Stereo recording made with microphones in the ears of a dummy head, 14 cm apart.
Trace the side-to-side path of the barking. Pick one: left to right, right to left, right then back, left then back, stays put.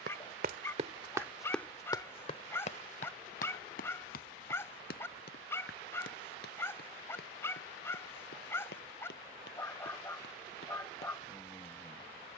stays put.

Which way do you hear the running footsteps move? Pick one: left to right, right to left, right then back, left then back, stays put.
right to left.